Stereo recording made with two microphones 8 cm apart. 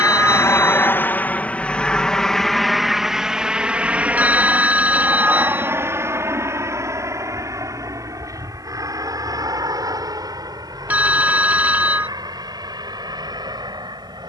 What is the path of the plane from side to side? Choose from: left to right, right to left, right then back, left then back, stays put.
left to right.